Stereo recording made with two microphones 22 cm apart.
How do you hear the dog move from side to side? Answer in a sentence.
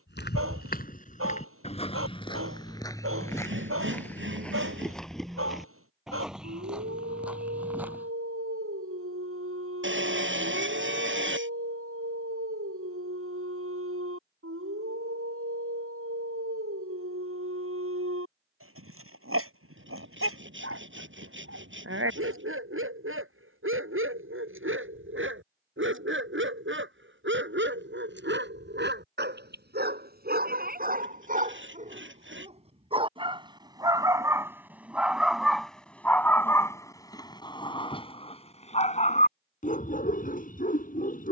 In this clip you hear the dog move from right to left.